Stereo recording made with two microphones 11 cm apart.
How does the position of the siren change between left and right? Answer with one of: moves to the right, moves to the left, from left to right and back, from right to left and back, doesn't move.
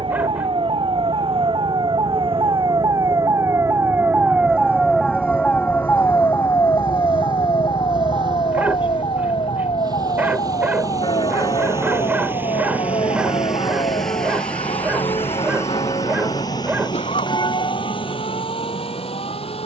moves to the left.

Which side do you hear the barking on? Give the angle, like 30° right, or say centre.
20° right.